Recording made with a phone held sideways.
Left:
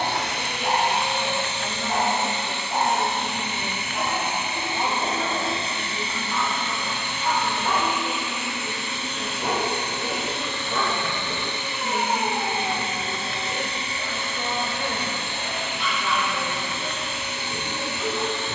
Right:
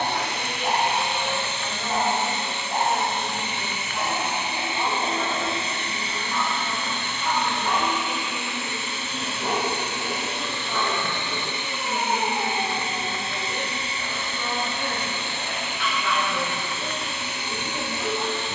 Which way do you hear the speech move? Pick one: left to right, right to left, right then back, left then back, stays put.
left to right.